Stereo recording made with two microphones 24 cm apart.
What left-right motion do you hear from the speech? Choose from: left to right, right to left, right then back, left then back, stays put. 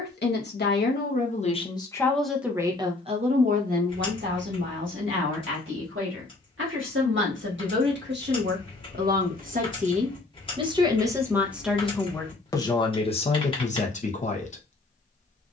right then back.